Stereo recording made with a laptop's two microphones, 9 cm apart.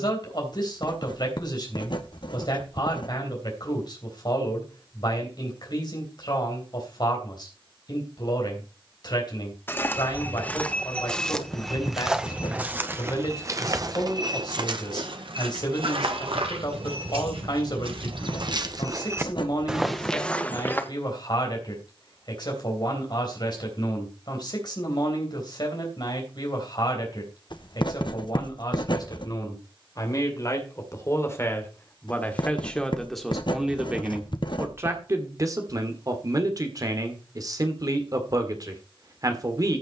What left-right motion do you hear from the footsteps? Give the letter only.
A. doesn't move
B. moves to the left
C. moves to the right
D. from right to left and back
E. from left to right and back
E.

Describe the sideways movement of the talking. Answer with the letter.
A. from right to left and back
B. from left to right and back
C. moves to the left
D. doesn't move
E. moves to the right
E.